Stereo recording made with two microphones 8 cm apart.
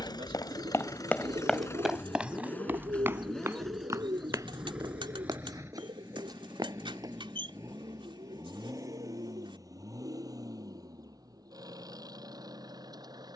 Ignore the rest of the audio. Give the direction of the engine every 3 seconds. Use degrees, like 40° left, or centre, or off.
40° left, 10° right, 30° right, 40° right, 50° right.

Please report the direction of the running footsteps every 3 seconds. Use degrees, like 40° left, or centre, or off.
10° left, 40° right, 50° right, off, off.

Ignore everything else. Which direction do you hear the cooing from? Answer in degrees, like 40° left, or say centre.
80° right.